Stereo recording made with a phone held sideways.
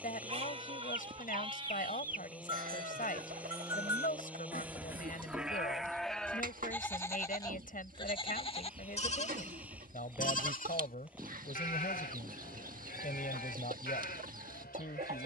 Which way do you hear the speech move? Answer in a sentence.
You can hear the speech stay in one place.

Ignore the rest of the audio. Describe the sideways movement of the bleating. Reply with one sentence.
You can hear the bleating travel towards the left.